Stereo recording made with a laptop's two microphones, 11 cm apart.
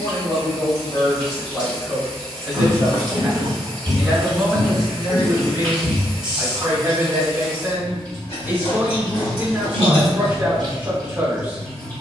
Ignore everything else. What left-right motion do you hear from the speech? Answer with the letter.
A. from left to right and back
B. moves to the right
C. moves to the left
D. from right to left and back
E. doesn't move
B.